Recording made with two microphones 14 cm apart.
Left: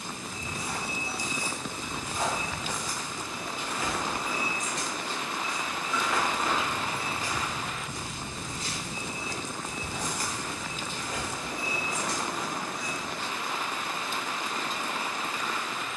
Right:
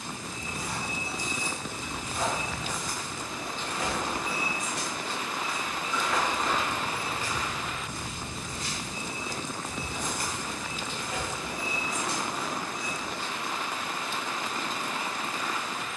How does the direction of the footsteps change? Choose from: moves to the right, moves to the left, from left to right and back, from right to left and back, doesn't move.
from left to right and back.